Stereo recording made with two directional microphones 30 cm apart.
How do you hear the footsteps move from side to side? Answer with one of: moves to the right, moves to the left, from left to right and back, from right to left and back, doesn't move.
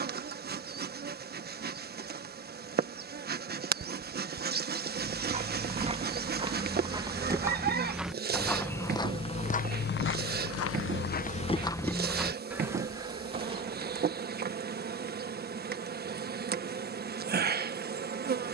from right to left and back.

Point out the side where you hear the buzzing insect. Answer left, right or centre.
right.